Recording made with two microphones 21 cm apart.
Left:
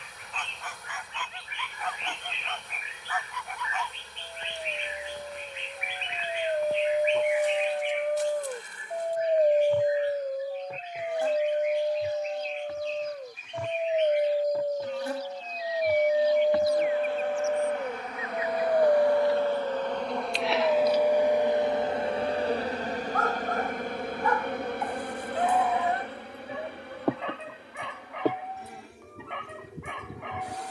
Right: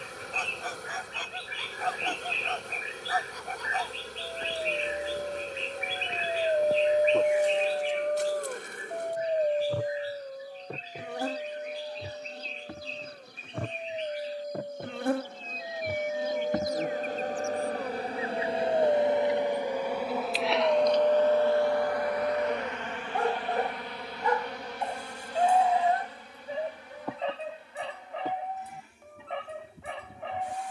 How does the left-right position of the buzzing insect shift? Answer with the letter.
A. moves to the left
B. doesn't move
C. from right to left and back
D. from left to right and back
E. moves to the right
A.